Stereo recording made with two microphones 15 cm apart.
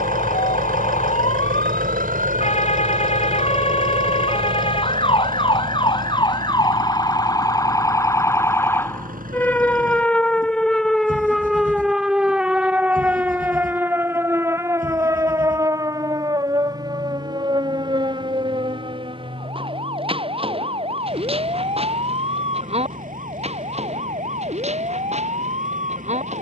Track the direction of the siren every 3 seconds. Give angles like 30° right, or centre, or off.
50° left, 40° left, 20° left, centre, 10° right, 30° right, 40° right, 40° right, 50° right.